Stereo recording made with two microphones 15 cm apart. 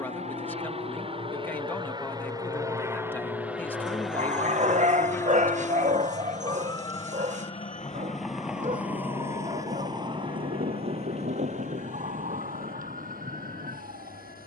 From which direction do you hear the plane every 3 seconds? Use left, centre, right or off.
right, centre, left, left, left.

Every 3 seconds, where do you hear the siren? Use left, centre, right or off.
left, left, centre, right, right.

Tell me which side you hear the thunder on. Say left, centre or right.
right.